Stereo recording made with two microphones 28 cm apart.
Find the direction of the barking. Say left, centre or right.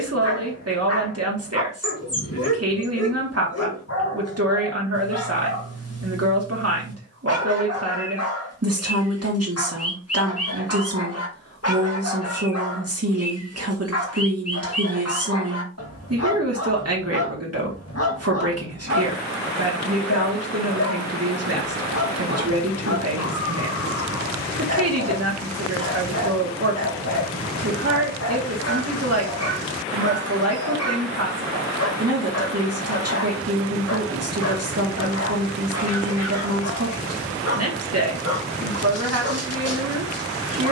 left.